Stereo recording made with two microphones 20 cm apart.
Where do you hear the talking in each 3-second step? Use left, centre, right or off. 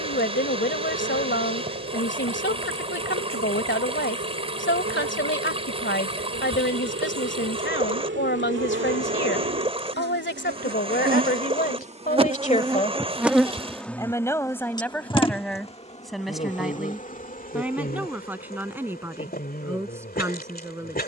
left, left, left, left, left, centre, centre.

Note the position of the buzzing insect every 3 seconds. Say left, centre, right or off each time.
right, right, right, right, centre, left, left.